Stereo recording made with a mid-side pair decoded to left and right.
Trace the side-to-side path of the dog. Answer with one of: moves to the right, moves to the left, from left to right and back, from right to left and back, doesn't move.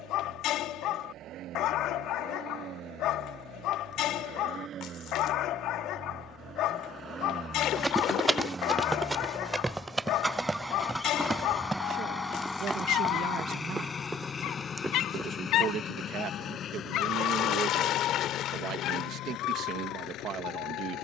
doesn't move.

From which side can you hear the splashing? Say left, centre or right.
left.